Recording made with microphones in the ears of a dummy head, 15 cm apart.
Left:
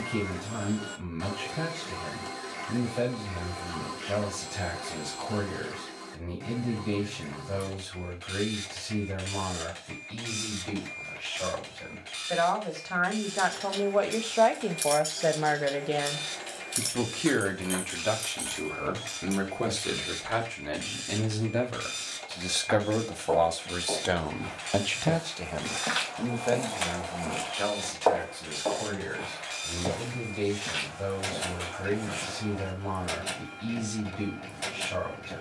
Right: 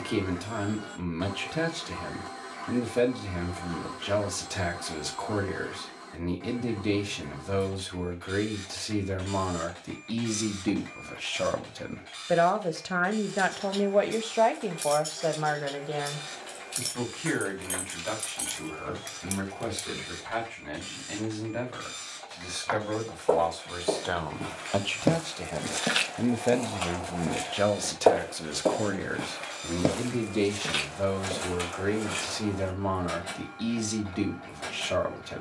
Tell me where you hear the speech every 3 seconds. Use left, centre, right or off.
right, right, right, right, right, left, left, left, centre, right, right, right.